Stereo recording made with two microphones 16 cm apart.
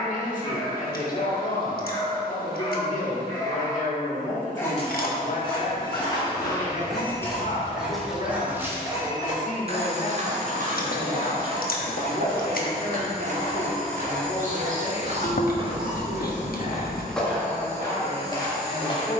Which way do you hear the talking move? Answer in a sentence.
In this clip you hear the talking stay in one place.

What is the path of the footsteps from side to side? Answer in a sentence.
In this clip you hear the footsteps go right and come back.